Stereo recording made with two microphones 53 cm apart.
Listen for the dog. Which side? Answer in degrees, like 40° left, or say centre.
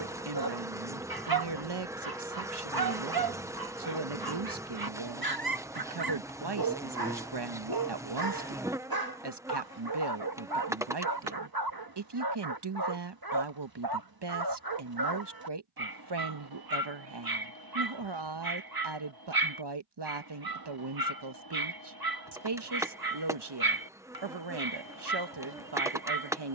40° right.